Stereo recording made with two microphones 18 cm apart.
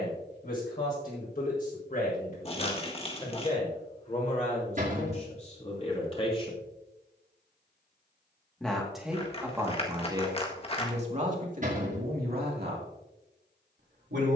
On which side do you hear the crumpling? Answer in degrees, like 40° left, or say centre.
30° left.